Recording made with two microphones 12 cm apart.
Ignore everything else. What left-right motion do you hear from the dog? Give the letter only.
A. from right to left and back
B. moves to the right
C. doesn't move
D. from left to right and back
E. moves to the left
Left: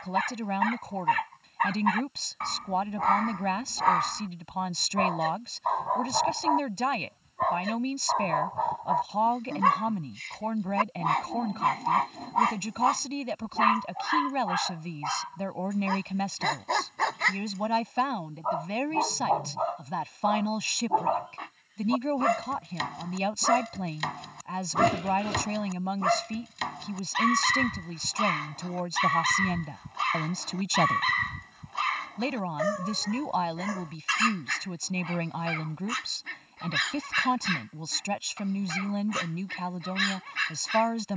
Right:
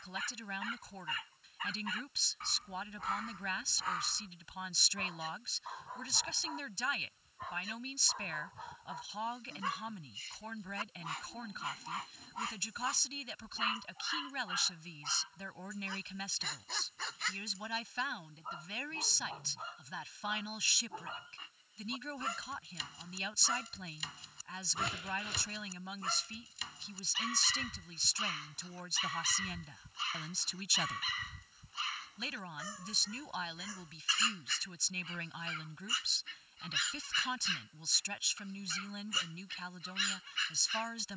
C.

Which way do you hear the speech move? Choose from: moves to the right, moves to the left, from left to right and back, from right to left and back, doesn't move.
doesn't move.